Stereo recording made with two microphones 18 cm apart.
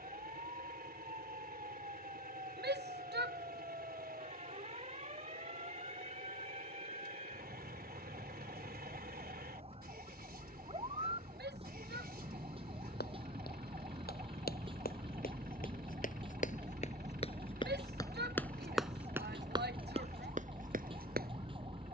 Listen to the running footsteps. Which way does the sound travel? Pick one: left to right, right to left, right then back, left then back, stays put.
left to right.